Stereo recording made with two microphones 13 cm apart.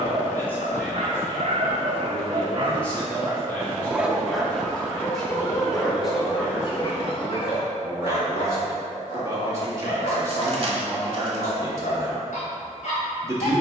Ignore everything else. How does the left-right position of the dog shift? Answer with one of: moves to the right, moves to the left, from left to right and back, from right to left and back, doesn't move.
moves to the left.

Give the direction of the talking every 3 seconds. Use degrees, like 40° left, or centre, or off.
10° left, centre, 10° right, 20° right, 20° right.